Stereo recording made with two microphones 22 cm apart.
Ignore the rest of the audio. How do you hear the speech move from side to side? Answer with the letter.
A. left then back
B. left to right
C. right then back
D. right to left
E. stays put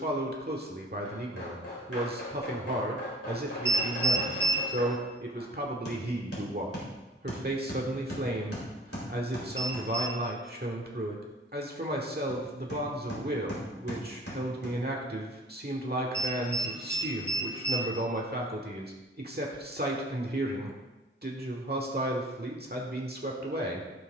E.